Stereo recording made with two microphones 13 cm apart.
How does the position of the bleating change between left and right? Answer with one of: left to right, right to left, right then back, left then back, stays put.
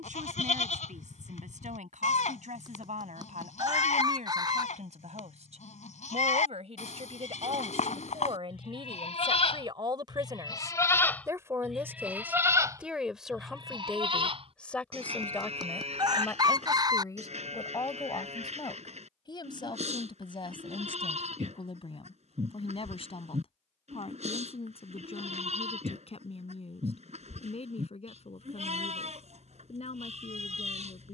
left to right.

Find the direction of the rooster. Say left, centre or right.
right.